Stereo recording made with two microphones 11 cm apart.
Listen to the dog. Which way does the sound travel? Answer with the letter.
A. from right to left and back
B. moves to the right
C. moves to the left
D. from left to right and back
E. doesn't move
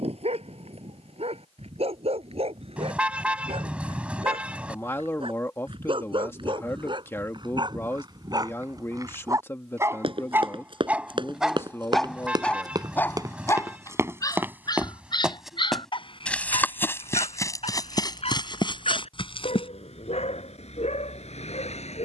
C.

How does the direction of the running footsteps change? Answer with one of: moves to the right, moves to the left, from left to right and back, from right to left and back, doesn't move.
moves to the left.